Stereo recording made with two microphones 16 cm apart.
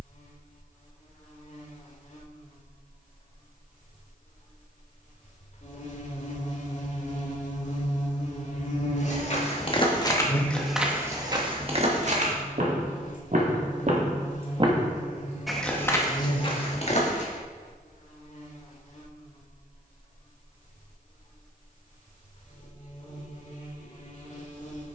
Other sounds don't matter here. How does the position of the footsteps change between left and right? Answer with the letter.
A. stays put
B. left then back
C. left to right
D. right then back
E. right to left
D.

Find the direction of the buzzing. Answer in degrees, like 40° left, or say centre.
50° left.